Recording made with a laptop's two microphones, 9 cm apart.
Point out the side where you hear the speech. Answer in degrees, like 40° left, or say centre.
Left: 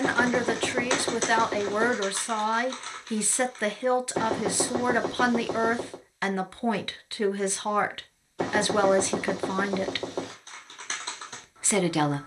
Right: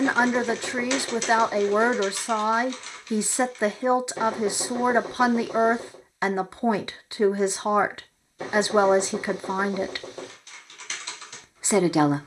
20° right.